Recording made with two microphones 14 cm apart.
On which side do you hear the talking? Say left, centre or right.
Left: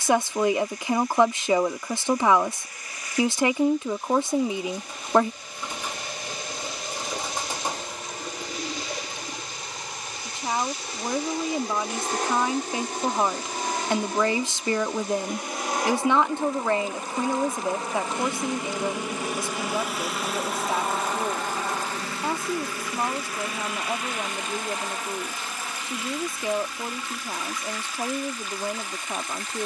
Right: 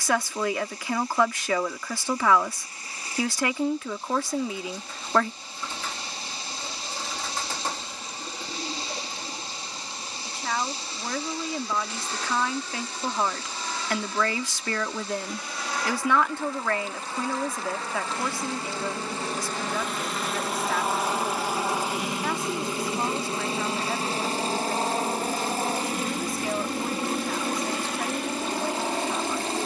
left.